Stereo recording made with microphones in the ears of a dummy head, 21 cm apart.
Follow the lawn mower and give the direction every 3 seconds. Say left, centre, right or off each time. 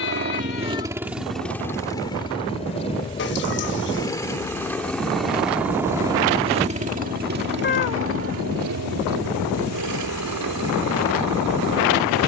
centre, centre, right, right.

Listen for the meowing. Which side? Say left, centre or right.
left.